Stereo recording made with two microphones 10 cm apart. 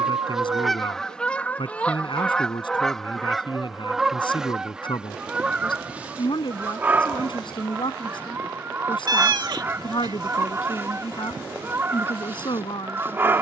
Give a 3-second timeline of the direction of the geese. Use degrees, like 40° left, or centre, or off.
10° left, centre, 20° right, 20° right, 20° right.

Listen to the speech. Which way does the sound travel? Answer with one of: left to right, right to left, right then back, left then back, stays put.
stays put.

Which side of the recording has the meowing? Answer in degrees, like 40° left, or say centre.
50° right.